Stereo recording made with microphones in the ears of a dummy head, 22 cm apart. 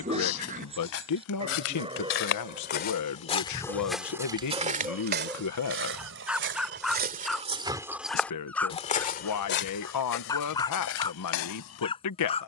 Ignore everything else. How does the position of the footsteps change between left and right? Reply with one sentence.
In this clip you hear the footsteps go right and come back.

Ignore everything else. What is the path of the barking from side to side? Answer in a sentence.
You can hear the barking go from the right side to the left.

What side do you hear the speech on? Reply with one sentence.
You can hear the speech on the left.